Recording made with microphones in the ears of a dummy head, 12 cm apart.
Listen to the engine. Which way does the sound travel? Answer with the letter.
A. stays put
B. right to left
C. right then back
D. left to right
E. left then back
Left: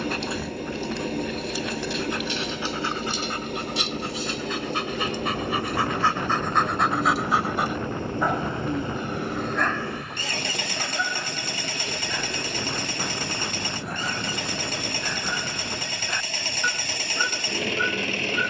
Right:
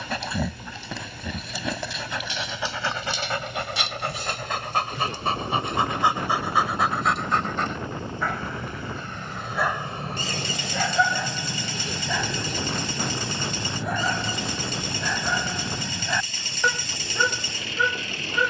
A.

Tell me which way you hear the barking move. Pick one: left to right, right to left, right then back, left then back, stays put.
left then back.